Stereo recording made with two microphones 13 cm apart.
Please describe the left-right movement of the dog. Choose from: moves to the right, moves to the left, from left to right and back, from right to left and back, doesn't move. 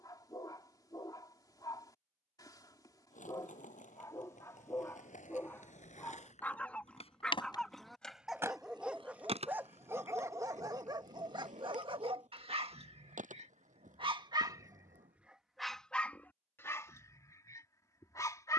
from left to right and back.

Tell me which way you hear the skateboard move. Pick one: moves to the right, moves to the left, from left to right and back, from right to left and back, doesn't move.
moves to the right.